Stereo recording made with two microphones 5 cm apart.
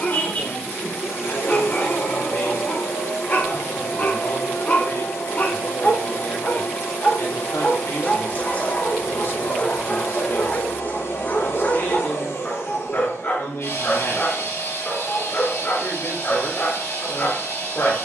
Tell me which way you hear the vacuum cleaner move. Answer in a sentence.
In this clip you hear the vacuum cleaner stay in one place.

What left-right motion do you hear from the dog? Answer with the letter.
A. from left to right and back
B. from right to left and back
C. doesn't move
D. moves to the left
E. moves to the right
C.